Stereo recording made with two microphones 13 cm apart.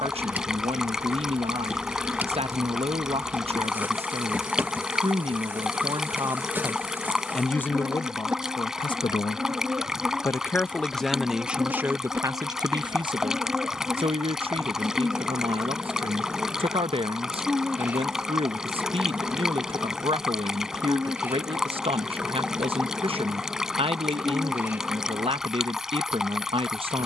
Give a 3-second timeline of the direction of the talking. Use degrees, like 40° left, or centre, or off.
50° right, 50° right, 10° left, 10° left, 40° right, 50° right, 50° right, 50° right, 50° right.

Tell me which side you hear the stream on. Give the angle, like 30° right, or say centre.
centre.